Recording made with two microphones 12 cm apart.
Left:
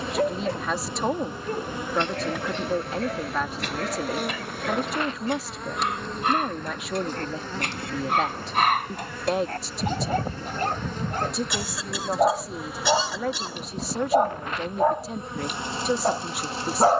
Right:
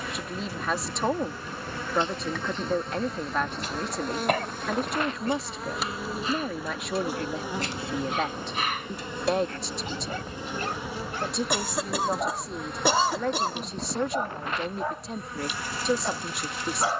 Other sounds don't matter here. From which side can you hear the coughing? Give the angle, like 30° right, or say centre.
50° right.